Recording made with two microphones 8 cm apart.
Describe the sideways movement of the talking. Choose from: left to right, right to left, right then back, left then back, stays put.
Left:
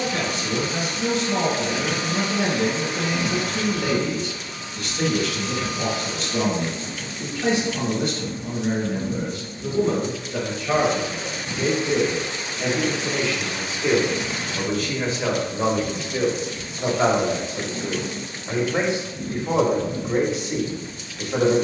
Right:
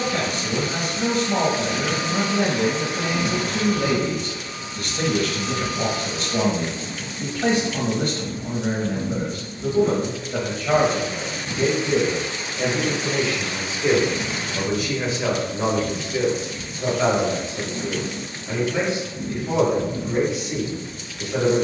right to left.